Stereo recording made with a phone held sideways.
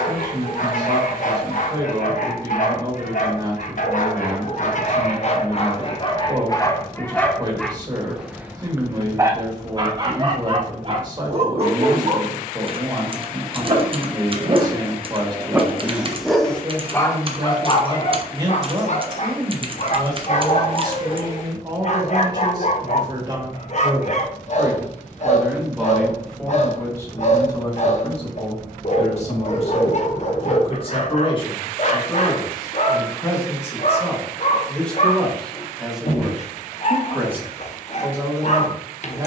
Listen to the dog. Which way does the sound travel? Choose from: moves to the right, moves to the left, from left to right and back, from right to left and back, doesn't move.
from left to right and back.